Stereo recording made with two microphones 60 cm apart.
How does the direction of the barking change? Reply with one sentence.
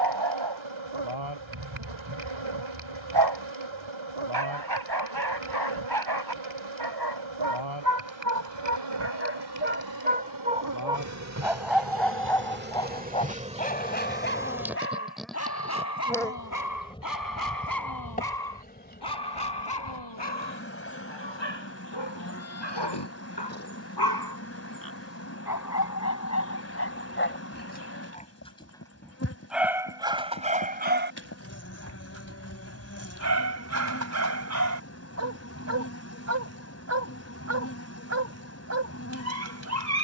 You can hear the barking move from right to left and back again.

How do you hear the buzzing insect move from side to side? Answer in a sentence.
You can hear the buzzing insect travel towards the left.